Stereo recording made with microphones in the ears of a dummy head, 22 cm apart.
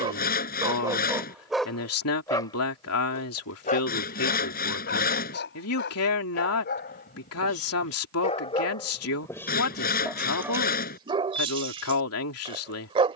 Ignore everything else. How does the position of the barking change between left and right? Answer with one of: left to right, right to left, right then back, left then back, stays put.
left then back.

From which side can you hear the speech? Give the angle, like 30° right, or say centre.
70° left.